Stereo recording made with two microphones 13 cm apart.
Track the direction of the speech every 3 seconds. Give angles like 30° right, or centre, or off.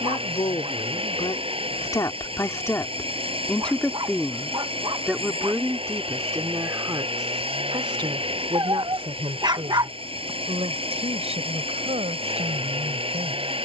30° left, centre, 30° right, 50° right, 60° right.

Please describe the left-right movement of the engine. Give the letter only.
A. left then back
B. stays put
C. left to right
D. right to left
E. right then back
B.